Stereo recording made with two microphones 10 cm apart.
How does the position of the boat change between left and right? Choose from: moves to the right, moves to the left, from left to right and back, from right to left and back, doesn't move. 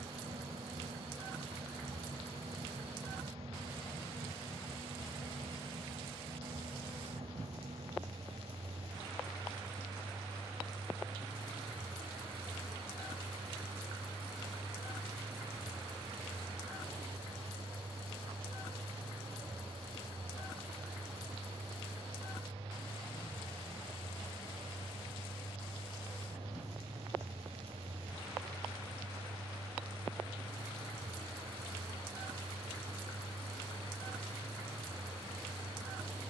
doesn't move.